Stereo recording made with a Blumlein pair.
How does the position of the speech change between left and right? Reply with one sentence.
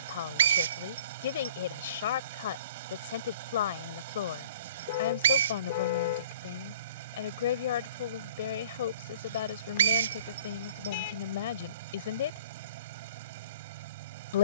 In this clip you hear the speech stay put.